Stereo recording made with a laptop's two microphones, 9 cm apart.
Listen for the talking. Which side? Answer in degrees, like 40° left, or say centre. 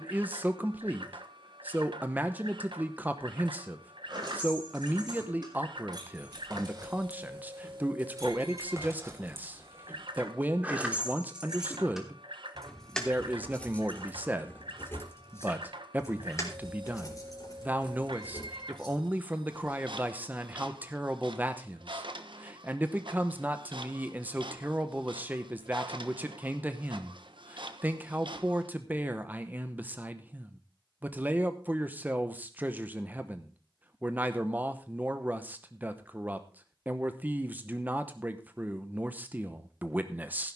20° right.